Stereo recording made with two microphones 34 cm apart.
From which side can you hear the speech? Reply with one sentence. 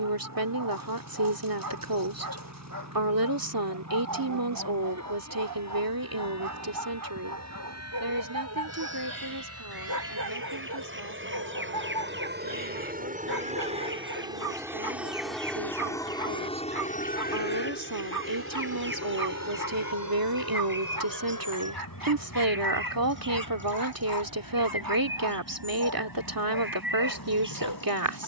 In this clip you hear the speech on the right.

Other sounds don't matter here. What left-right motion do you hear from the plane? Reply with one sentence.
You can hear the plane go from the right side to the left.